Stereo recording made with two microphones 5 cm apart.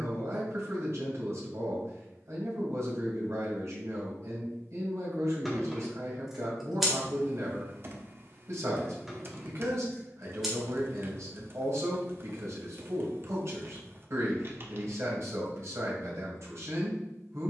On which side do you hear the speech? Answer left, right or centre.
right.